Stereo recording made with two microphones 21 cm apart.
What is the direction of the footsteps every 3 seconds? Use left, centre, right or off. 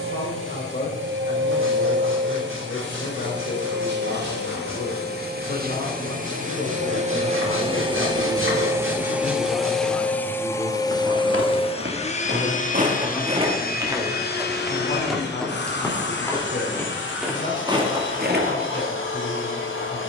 off, off, off, right, right, centre, right.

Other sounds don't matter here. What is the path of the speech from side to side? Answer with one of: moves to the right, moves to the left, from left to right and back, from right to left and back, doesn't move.
from left to right and back.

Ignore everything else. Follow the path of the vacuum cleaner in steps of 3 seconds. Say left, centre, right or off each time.
right, right, right, centre, left, left, left.